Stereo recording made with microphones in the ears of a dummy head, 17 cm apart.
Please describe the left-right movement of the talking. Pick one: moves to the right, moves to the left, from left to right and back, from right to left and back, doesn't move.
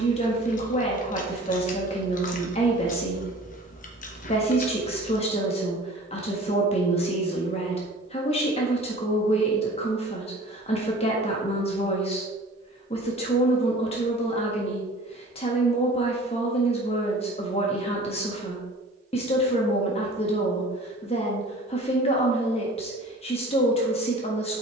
doesn't move.